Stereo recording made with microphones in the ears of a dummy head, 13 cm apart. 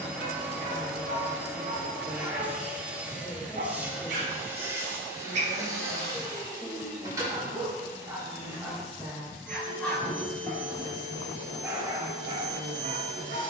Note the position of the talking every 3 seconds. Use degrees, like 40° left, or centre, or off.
20° left, 10° left, 10° right, 40° right, 50° right.